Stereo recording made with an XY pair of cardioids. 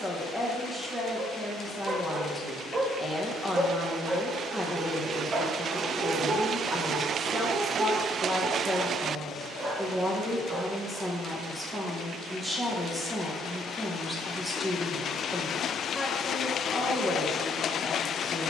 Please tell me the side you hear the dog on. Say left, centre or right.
right.